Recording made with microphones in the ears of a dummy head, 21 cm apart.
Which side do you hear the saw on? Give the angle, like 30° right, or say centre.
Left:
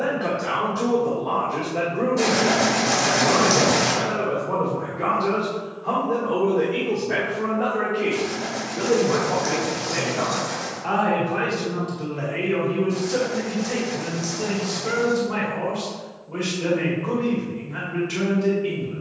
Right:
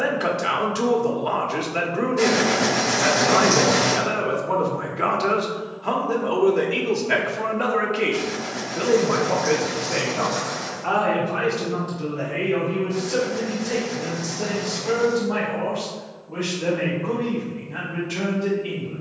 20° left.